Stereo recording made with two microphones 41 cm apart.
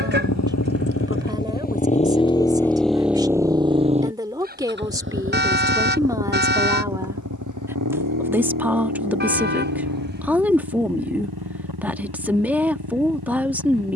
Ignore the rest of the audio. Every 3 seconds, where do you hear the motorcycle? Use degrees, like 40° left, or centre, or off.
20° left, 20° right, 40° right, 50° right, 60° right.